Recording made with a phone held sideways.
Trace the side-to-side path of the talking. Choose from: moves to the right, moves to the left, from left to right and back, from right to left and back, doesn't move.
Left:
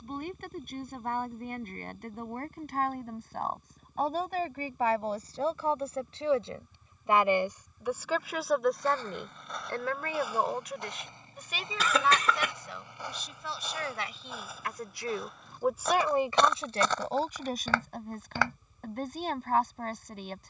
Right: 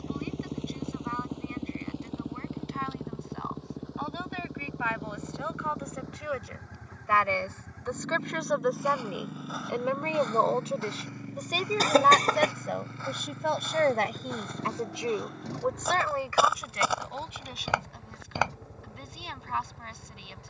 from left to right and back.